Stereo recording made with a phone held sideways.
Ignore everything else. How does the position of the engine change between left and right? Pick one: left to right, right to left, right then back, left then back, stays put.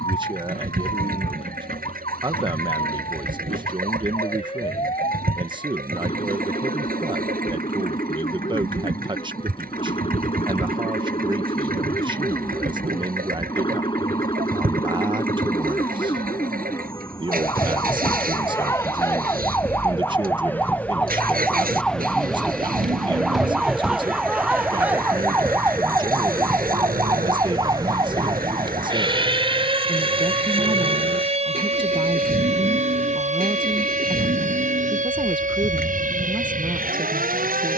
stays put.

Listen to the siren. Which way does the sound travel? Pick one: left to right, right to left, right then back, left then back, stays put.
left to right.